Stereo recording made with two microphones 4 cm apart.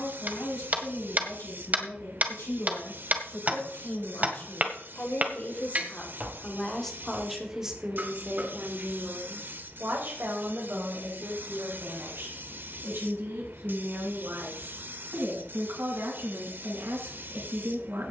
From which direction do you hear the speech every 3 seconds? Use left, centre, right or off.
left, left, centre, right, right, right.